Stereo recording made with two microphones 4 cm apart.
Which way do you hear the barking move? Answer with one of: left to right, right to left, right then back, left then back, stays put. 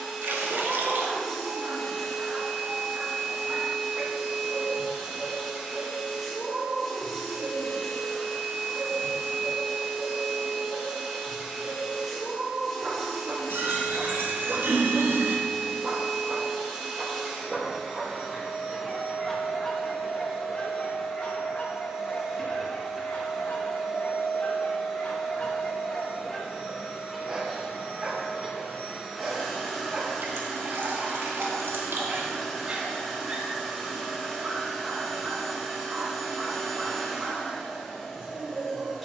left then back.